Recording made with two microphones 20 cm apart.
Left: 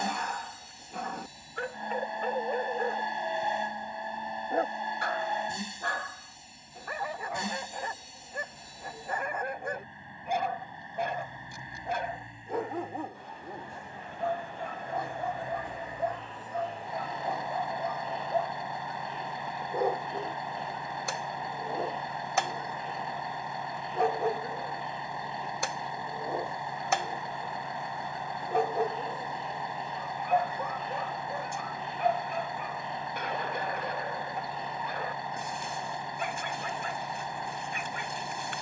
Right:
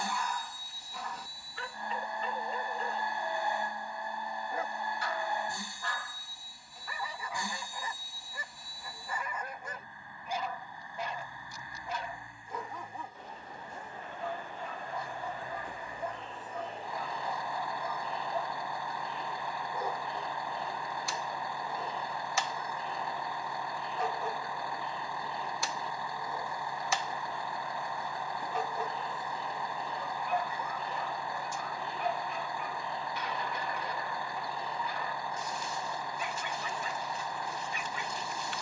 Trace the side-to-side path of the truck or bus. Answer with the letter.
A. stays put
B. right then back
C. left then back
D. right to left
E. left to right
A.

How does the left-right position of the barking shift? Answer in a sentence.
In this clip you hear the barking stay put.